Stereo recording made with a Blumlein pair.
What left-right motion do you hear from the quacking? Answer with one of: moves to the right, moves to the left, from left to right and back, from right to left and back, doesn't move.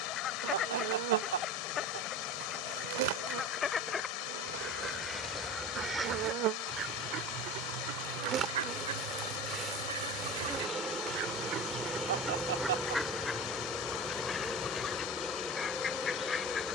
from left to right and back.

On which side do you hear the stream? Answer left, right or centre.
left.